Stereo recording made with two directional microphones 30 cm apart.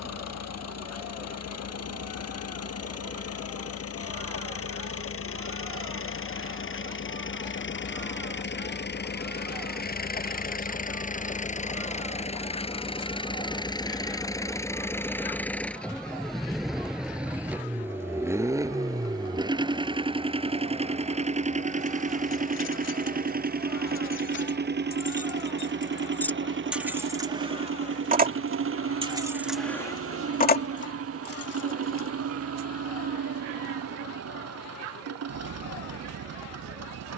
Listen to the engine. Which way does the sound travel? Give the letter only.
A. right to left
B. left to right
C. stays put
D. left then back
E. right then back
B.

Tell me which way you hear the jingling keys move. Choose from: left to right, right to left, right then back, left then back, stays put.
right then back.